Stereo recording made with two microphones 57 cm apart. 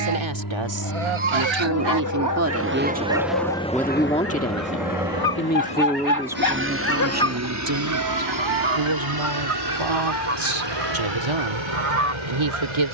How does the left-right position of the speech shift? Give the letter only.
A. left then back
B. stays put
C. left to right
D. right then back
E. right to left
A.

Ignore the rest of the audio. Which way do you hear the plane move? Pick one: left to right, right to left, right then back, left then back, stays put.
left to right.